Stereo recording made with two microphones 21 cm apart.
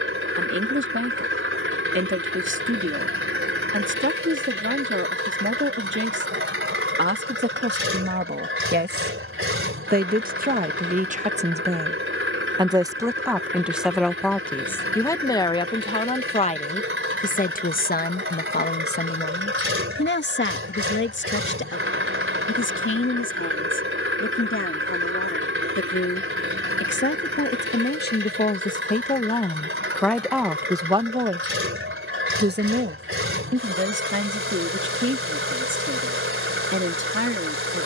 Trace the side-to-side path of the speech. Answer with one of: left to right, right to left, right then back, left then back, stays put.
left then back.